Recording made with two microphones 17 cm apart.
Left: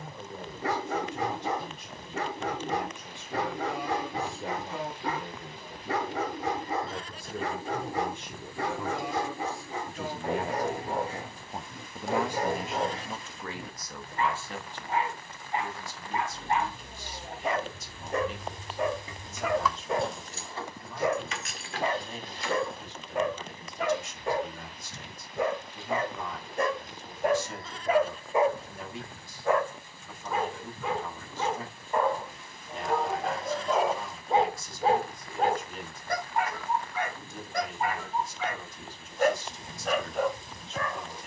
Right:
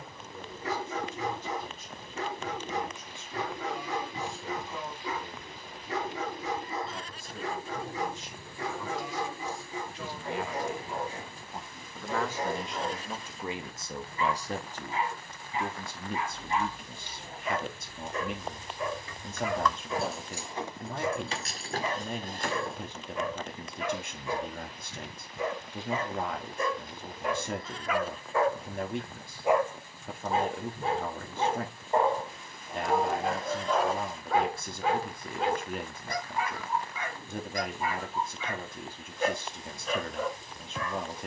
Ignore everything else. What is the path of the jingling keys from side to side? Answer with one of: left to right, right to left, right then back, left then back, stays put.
left to right.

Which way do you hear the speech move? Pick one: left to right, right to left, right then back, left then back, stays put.
left to right.